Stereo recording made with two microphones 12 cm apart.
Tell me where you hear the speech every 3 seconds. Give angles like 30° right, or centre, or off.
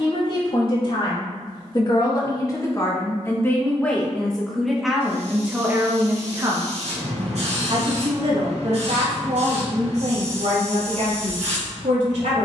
40° left, centre, 40° right, 60° right.